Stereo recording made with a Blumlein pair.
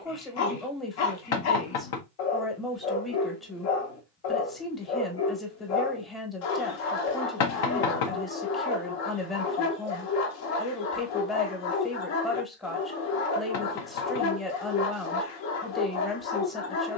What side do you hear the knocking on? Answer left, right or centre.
left.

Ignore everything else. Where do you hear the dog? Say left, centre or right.
left.